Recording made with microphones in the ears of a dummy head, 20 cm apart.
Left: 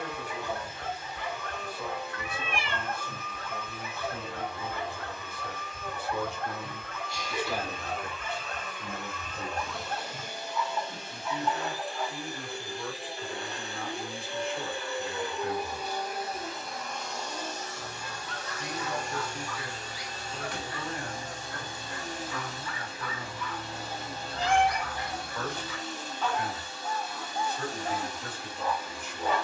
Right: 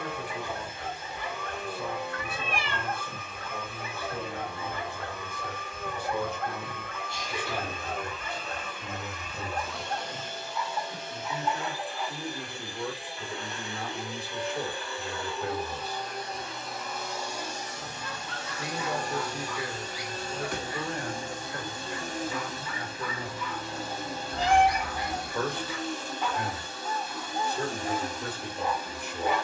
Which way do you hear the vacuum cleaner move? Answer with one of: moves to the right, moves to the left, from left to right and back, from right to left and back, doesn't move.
from right to left and back.